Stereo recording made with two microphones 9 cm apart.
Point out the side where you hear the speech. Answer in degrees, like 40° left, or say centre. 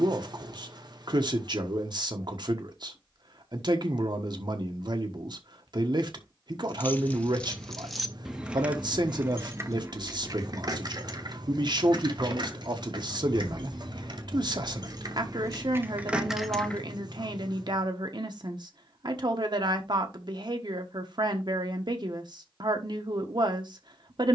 60° right.